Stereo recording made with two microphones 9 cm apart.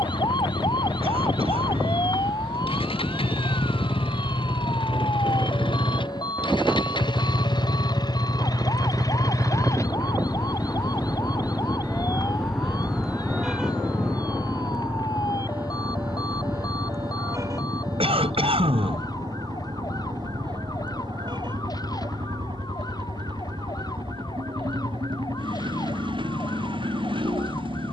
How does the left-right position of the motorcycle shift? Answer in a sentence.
In this clip you hear the motorcycle move to the right.